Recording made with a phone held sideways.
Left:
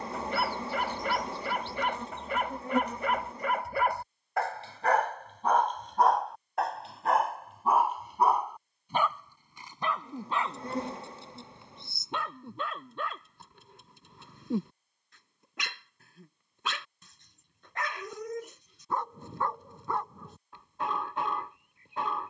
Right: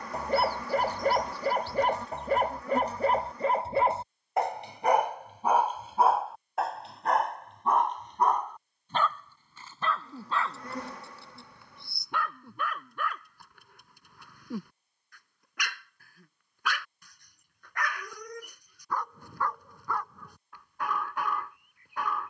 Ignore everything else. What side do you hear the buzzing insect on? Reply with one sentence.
In this clip you hear the buzzing insect on the left.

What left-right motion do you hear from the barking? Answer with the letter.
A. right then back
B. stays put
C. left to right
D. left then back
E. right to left
E.